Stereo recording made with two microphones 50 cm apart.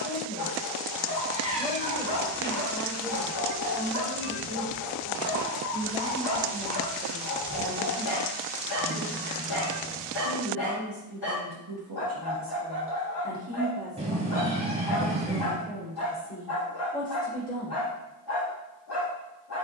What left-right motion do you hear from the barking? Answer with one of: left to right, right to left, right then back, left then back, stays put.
stays put.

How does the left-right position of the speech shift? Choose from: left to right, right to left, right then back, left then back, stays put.
right then back.